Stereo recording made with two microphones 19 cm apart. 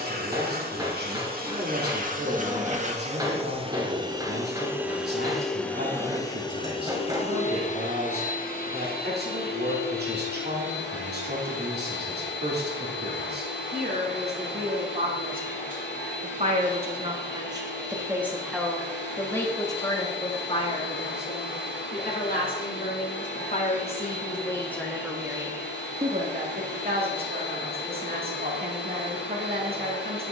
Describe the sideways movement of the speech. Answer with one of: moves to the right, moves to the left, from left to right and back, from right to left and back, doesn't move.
from right to left and back.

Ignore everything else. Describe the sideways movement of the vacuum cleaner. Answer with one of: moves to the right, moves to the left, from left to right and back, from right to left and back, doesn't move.
moves to the left.